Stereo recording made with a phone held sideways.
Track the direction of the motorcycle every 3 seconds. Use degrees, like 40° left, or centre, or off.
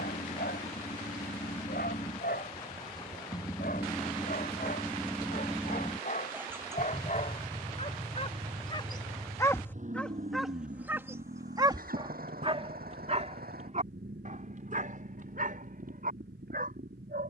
40° left, 10° left, 30° right, 50° right, 70° right, 80° right.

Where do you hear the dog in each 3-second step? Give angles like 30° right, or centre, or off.
80° left, 70° left, 50° left, 10° right, 50° right, 60° right.